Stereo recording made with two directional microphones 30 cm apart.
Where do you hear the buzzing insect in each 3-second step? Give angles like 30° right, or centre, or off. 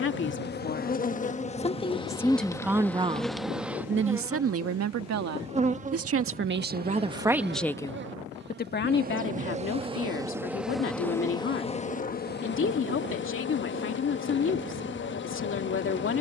20° left, 10° right, 30° right, centre, 40° left, 40° left.